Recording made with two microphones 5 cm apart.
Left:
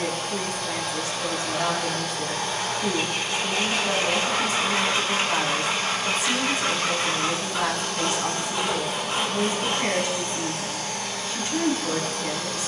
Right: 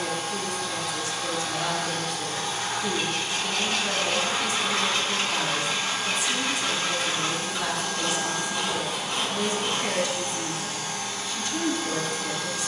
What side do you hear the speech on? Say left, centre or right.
left.